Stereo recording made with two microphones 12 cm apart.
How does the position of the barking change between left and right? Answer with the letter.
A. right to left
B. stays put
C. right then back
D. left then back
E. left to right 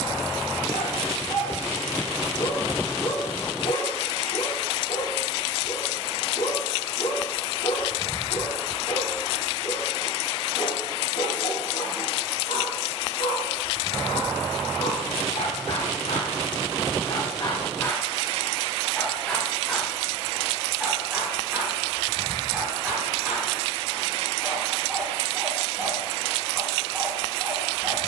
E.